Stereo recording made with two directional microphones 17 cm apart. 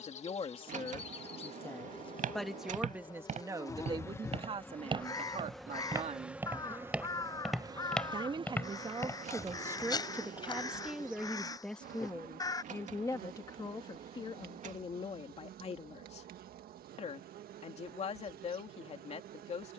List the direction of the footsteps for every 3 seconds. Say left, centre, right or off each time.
right, right, centre, left, off, off, off.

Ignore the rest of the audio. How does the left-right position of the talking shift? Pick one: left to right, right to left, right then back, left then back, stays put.
right then back.